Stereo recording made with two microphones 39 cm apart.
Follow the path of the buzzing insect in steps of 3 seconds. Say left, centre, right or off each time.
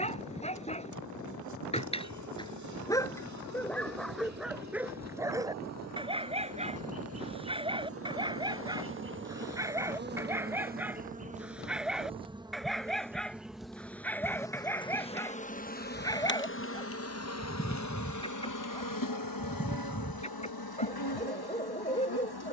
right, right, right, right, centre, left, left, left.